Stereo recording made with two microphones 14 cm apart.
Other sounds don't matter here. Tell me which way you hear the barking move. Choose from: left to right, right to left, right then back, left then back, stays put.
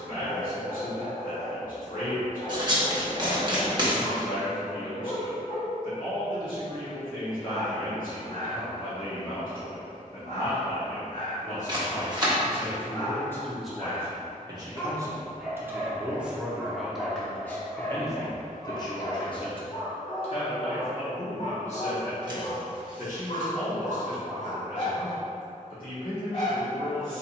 right then back.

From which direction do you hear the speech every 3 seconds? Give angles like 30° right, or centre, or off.
70° left, 70° left, 70° left, 70° left, 10° left, centre, 40° left, 60° left, 70° left.